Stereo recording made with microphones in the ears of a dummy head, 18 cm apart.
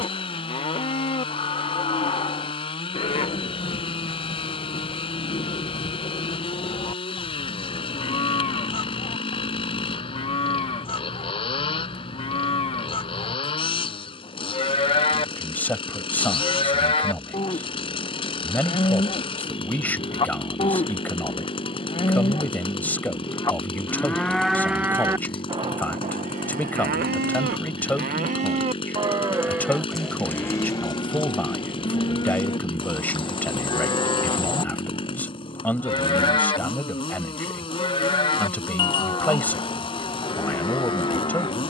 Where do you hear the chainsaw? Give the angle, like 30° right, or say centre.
30° left.